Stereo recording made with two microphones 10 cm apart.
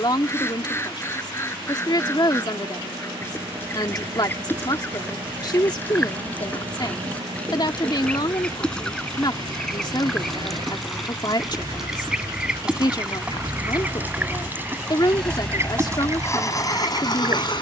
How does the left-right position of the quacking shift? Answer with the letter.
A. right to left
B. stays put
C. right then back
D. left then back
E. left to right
E.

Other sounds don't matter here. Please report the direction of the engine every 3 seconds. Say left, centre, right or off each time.
right, right, right, right, right, left.